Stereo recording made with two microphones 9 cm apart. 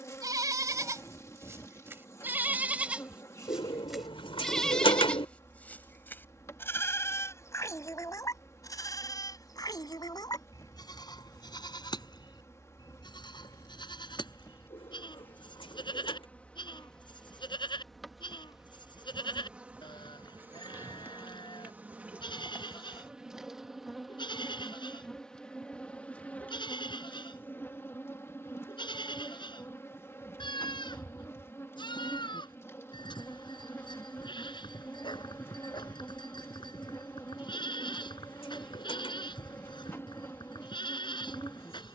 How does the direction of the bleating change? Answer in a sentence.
In this clip you hear the bleating move to the left.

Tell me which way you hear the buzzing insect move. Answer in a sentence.
In this clip you hear the buzzing insect go right and come back.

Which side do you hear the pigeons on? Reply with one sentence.
You can hear the pigeons on the left.